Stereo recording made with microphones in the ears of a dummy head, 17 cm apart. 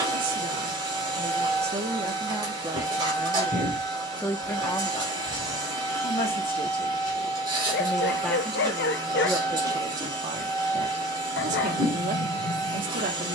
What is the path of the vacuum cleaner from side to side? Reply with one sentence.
You can hear the vacuum cleaner stay put.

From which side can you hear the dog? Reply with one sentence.
In this clip you hear the dog on the left.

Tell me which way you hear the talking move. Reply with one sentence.
In this clip you hear the talking move from right to left and back again.